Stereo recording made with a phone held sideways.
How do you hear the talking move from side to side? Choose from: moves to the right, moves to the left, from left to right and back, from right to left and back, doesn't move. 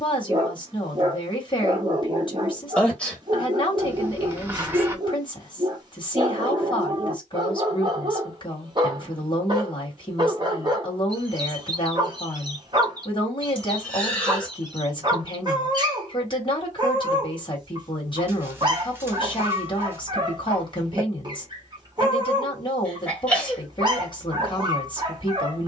doesn't move.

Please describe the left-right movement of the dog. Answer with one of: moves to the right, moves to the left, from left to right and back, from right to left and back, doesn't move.
doesn't move.